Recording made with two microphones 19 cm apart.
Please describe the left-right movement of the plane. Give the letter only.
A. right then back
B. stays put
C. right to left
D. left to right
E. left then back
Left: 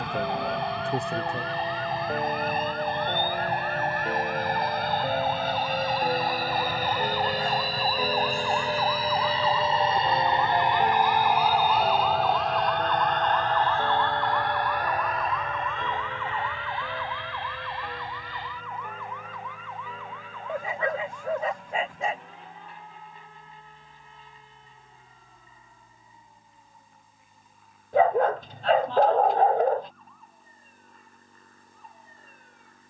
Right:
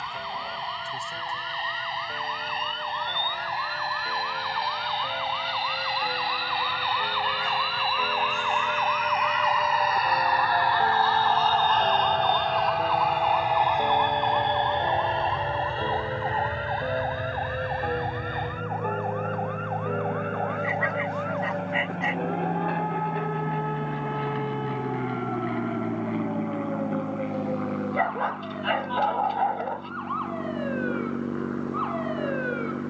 D.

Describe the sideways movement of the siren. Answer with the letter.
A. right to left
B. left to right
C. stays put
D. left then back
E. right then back
B.